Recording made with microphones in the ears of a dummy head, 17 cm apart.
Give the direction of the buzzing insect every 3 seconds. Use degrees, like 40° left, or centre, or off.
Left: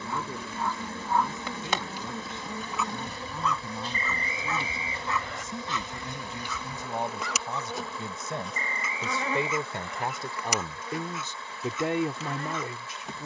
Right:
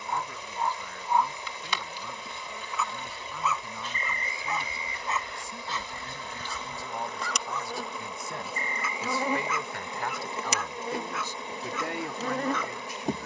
40° left, 30° left, centre, 20° right, 30° right.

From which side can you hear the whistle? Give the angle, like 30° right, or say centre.
60° left.